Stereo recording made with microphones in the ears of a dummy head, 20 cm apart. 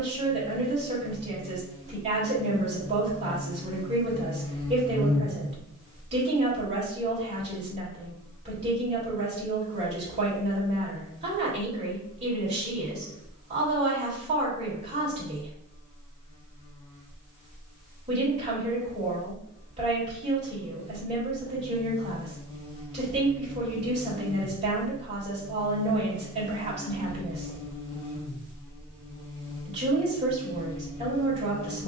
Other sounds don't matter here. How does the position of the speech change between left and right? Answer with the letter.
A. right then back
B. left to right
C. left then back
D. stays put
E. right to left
D.